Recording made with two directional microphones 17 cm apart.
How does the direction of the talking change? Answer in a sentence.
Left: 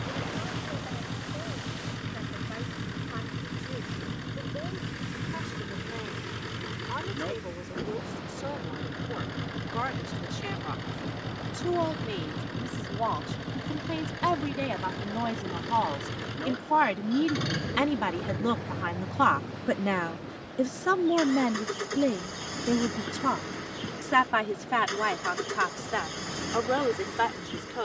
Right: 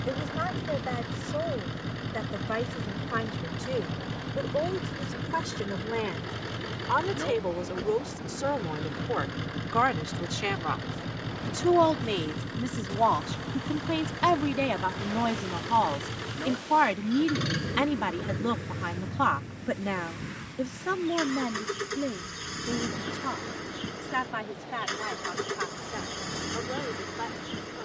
In this clip you hear the talking move to the left.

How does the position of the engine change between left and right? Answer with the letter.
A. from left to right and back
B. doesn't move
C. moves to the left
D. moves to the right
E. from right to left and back
B.